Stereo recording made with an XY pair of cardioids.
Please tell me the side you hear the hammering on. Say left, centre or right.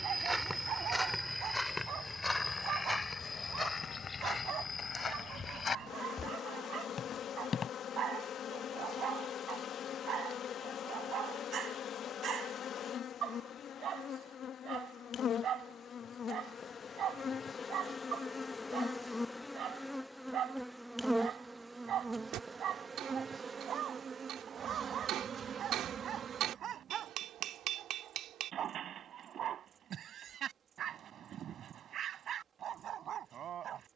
right.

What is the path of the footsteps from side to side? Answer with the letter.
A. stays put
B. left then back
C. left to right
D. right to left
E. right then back
D.